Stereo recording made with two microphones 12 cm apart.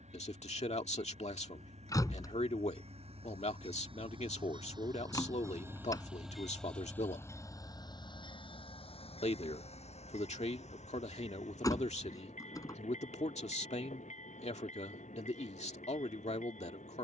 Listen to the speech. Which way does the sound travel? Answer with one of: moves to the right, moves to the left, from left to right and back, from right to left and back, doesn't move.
doesn't move.